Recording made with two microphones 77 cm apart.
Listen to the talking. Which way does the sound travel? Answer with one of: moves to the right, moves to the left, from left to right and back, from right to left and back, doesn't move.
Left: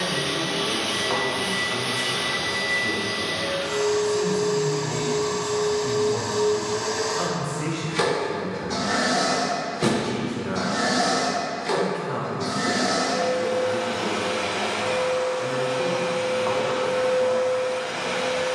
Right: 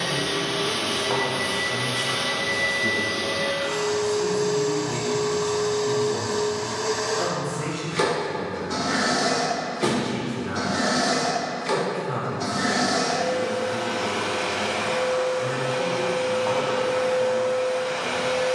from right to left and back.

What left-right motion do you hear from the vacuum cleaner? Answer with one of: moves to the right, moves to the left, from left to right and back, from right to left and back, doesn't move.
moves to the right.